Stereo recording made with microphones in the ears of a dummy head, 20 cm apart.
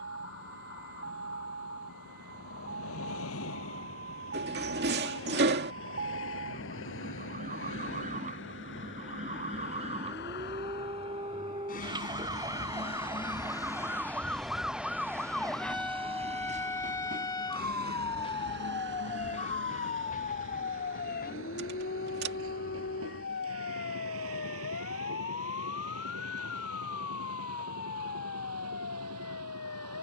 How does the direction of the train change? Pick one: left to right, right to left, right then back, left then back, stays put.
left to right.